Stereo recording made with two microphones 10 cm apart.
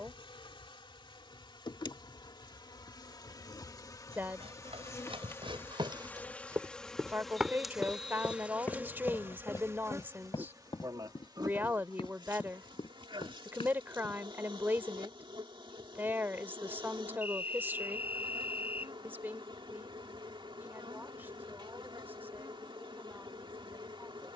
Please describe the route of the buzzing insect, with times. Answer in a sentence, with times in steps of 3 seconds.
You can hear the buzzing insect on the left from 0 s, in the centre from 6 s and on the right from 9 s.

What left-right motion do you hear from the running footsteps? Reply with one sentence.
You can hear the running footsteps move from right to left.